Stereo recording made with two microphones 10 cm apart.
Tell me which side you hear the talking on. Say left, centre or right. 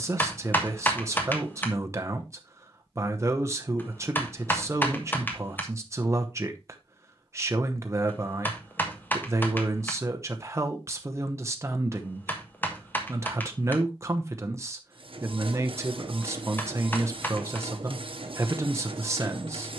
right.